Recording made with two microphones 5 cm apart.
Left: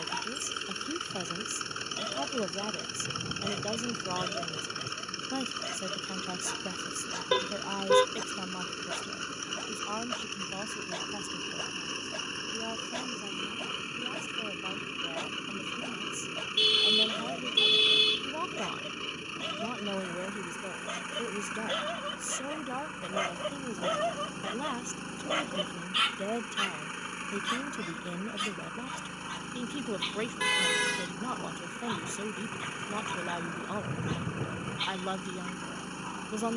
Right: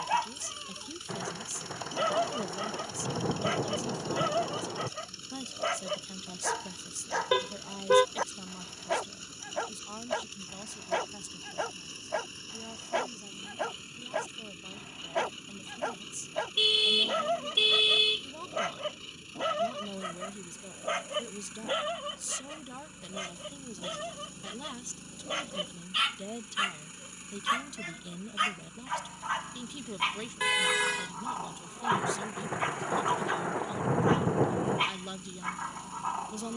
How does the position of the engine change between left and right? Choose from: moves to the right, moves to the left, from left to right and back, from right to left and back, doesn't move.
doesn't move.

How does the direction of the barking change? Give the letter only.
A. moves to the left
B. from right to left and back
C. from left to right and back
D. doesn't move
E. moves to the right
B.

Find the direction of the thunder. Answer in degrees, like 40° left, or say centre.
60° right.